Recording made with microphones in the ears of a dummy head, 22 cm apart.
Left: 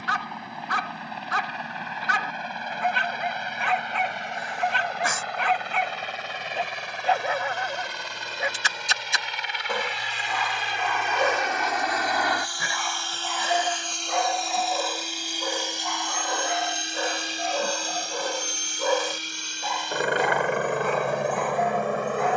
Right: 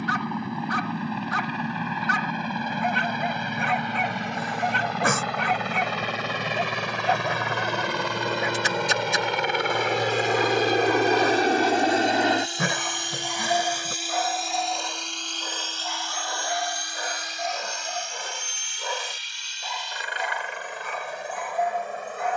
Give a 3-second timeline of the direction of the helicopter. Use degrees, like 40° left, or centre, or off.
70° right, 70° right, 60° right, 40° right, 10° right, 20° left, 40° left, 50° left.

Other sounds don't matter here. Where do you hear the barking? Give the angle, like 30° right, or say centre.
60° left.